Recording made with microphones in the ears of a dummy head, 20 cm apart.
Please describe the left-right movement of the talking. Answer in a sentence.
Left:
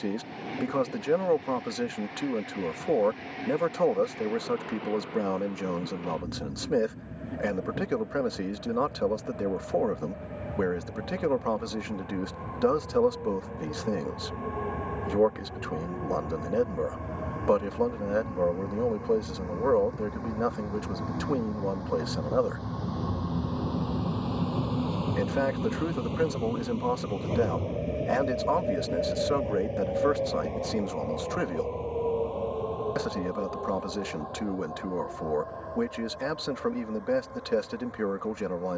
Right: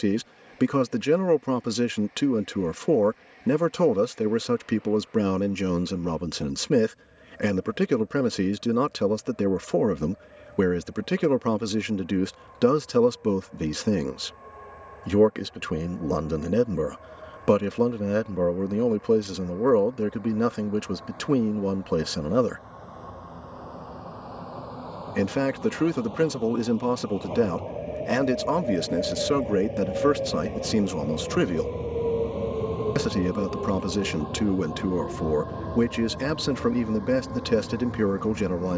You can hear the talking stay in one place.